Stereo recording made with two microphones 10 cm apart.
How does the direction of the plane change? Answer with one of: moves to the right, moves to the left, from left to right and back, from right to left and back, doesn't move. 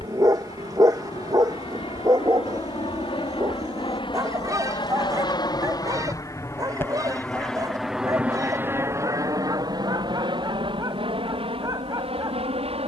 moves to the right.